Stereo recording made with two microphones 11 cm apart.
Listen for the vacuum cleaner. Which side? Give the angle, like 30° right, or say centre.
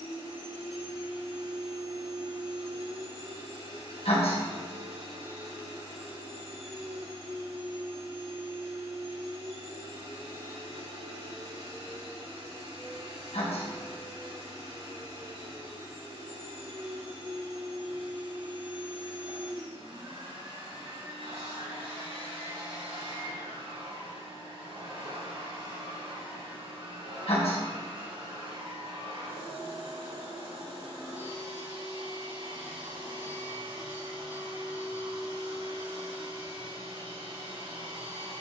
90° right.